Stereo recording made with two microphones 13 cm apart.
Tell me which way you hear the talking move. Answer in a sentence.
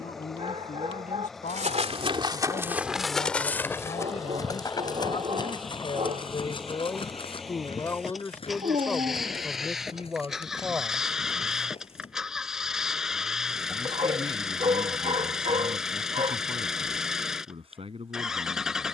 You can hear the talking go from the left side to the right.